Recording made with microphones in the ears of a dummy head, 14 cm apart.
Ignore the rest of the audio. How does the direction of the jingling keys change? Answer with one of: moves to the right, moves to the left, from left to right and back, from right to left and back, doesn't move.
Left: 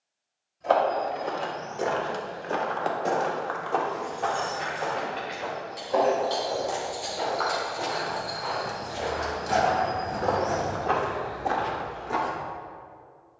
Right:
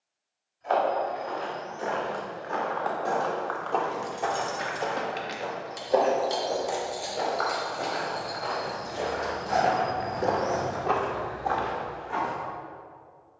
from right to left and back.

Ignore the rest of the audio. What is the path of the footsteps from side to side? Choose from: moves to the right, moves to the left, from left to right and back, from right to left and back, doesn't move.
from left to right and back.